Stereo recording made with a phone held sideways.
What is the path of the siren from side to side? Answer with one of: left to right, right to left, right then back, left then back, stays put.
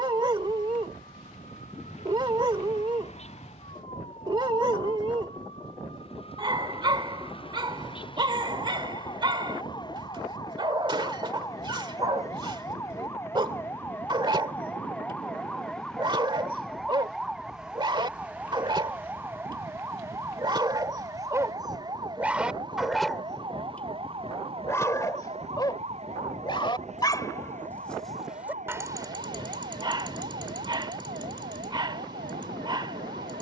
left to right.